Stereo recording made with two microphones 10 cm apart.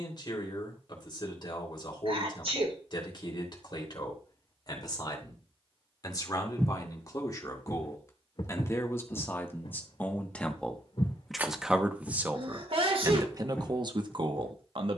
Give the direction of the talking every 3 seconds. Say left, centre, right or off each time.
left, left, left, centre, right.